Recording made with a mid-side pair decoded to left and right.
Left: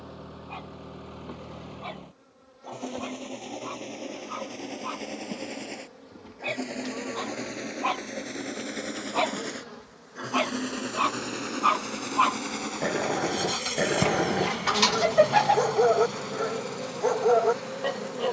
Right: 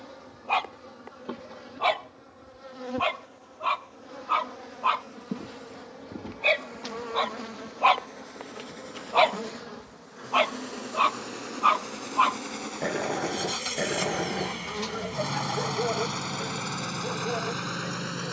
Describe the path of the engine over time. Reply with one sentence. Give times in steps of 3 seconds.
You can hear the engine on the left from 0 s, in the centre from 12 s and on the right from 15 s.